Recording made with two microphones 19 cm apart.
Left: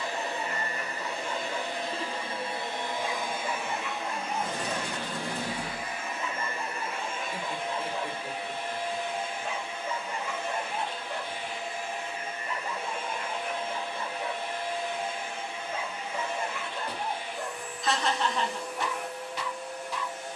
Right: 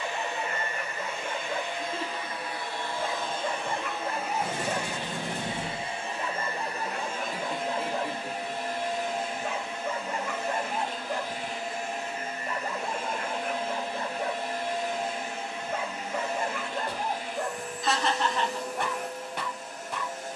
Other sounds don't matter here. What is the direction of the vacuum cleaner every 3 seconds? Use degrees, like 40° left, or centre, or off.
30° left, 10° right, 40° right, 40° right, 40° right, 40° right, 40° right.